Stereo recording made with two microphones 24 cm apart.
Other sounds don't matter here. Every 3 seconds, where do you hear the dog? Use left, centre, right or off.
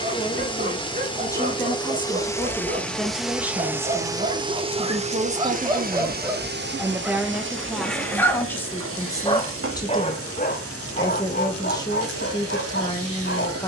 right, right, centre, left, left.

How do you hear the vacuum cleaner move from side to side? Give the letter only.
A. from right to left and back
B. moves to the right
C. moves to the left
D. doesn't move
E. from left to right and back
B.